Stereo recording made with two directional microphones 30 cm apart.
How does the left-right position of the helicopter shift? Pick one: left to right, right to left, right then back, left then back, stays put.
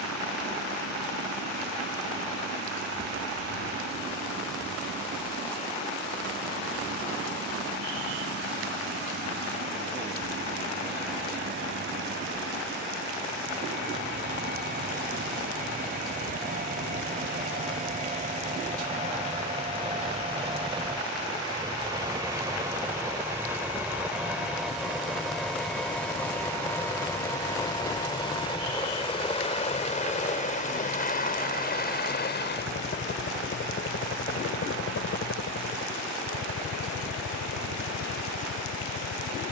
right to left.